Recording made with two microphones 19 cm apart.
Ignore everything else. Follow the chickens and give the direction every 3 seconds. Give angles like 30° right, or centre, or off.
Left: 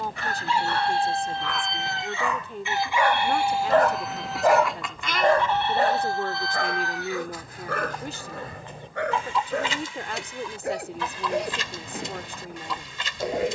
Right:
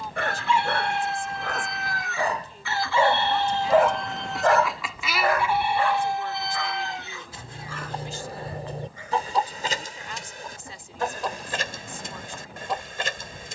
30° left, centre, 30° right, 50° right, 50° right.